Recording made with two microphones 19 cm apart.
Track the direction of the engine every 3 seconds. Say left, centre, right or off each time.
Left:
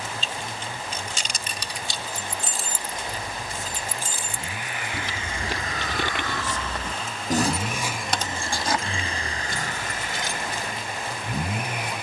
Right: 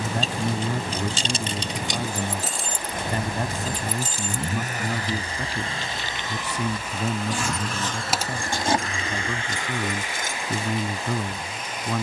right, right, centre, left.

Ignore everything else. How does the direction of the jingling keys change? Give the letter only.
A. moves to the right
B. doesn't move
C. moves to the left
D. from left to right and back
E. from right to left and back
E.